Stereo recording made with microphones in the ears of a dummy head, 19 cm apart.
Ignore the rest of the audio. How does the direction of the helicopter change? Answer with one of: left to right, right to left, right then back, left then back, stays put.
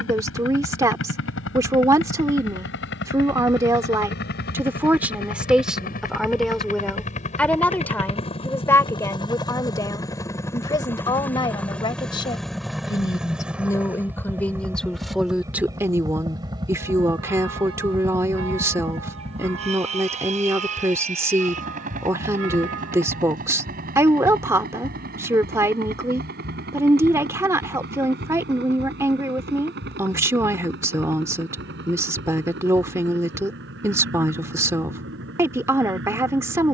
left to right.